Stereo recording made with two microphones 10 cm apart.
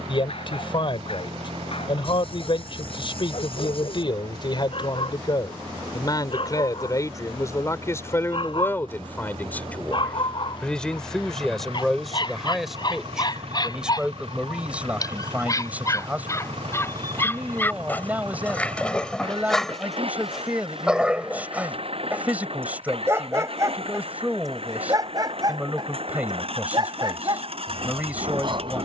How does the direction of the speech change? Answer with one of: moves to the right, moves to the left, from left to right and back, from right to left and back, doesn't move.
moves to the right.